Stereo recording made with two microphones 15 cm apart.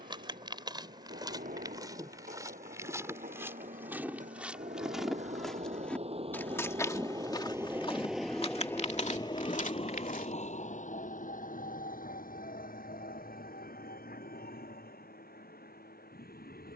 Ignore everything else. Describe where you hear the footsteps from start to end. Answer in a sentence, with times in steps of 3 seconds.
In this clip you hear the footsteps on the right from 0 s, in the centre from 3 s, on the left from 6 s and not at all from 12 s.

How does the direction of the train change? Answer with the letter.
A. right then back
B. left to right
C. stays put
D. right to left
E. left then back
D.